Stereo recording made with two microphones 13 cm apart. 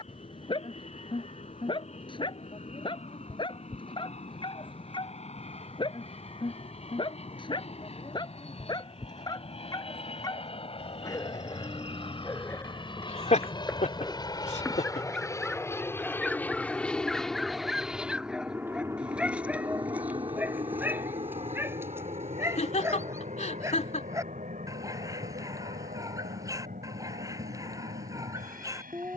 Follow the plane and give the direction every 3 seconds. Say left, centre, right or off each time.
left, left, left, left, left, centre, right, right, right, right.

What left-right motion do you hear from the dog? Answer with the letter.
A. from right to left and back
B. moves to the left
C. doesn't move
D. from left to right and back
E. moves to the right
E.